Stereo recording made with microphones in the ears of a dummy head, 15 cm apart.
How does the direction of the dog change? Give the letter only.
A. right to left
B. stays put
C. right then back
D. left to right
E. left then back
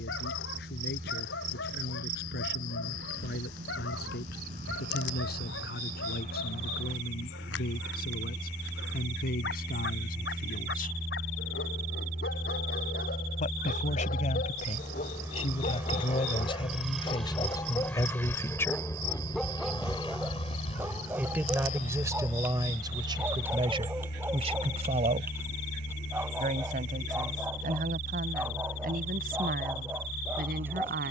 D.